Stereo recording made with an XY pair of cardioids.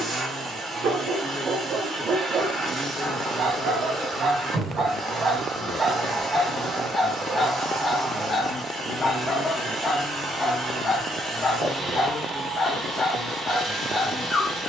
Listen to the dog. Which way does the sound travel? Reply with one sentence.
You can hear the dog move to the left.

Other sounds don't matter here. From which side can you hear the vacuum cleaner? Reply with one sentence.
In this clip you hear the vacuum cleaner on the right.